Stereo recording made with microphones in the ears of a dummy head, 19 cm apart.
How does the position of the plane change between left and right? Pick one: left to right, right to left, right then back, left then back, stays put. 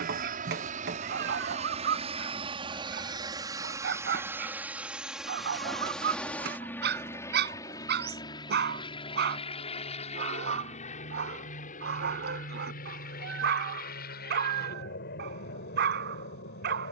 right to left.